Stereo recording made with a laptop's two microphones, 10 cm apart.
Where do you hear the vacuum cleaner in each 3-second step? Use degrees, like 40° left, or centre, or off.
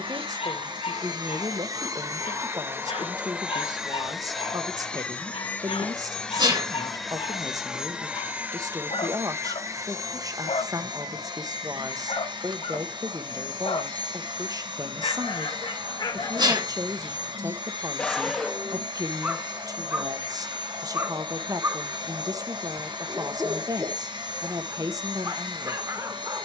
40° right, centre, 10° right, 40° right, 50° right, 50° right, 50° right, 50° right, 50° right.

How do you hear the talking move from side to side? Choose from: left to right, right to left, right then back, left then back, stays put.
stays put.